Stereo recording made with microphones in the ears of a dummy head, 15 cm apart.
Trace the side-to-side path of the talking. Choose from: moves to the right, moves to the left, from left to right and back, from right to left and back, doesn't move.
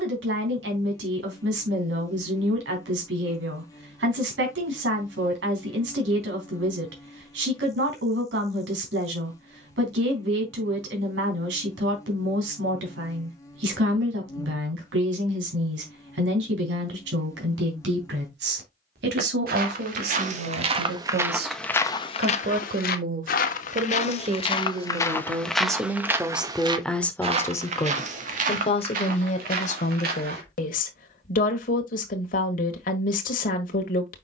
moves to the left.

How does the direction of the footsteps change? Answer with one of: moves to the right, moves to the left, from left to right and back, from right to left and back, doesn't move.
from right to left and back.